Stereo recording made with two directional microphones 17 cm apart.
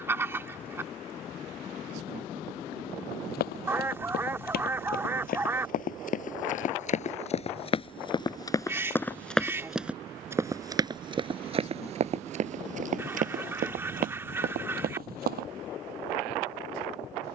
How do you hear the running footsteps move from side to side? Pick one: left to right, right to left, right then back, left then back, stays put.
left to right.